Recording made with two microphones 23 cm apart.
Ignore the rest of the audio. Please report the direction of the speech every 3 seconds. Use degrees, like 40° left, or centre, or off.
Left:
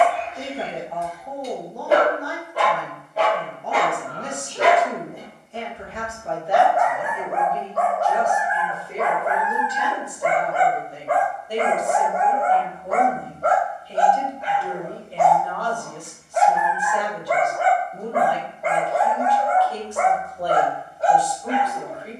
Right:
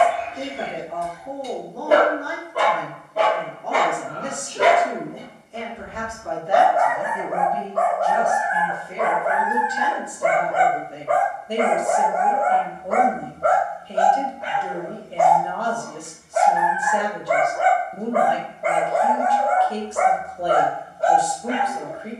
70° right, 70° right, 60° right, 30° right, 20° right, 20° right, 20° right, 20° right.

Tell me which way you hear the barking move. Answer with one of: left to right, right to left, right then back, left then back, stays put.
stays put.